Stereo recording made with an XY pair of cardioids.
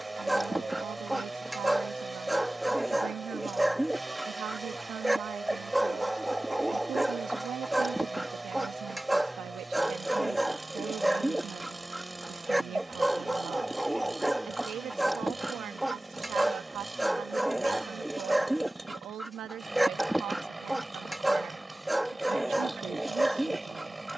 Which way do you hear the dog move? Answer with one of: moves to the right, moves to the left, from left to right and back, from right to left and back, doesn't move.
doesn't move.